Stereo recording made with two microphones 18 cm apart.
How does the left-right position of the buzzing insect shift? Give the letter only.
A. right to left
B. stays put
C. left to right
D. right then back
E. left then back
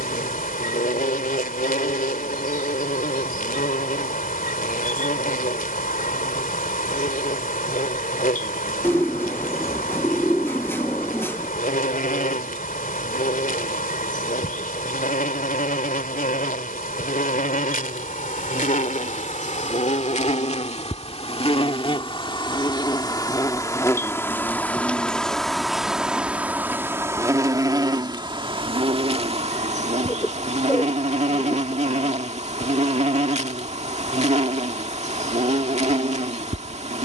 C.